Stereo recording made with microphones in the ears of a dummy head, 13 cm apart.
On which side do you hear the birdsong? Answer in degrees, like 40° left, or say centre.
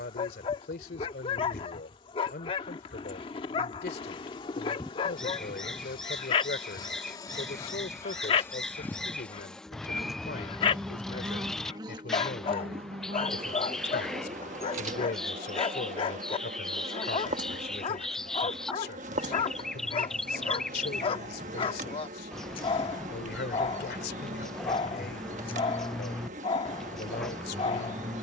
centre.